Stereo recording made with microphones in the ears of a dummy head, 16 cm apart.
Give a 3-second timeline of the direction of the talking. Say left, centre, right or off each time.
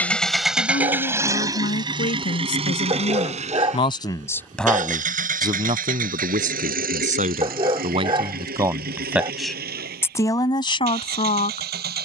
left, centre, right, left.